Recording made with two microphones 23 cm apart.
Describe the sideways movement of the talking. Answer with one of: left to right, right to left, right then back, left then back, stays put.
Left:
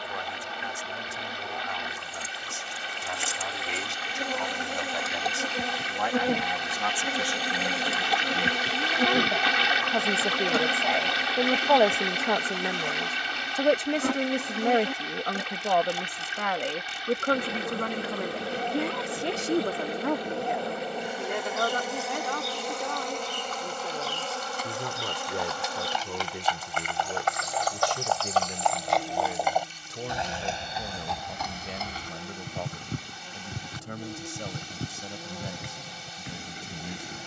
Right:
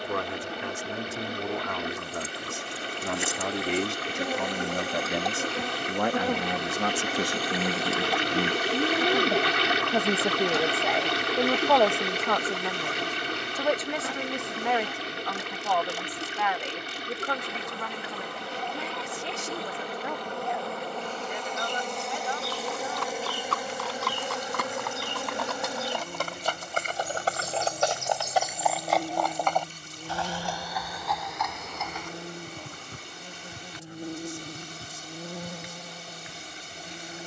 right to left.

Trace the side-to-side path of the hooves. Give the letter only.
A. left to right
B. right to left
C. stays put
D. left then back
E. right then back
B.